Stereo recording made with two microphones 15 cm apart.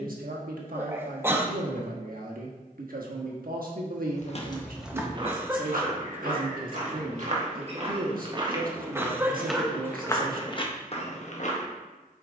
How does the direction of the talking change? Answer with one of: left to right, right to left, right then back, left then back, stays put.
stays put.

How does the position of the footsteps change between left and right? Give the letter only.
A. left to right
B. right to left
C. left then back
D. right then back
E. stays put
D.